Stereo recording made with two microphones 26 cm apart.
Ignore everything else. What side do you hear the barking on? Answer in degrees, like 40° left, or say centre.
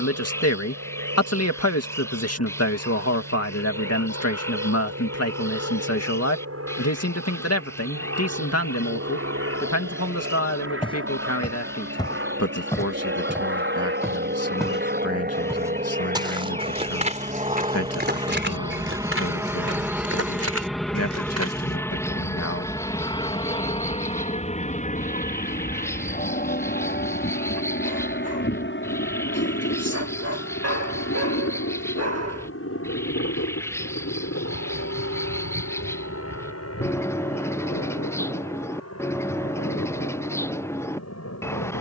70° right.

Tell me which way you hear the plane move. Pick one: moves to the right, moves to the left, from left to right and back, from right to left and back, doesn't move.
moves to the left.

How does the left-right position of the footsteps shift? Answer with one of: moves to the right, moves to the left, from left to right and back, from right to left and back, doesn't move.
moves to the right.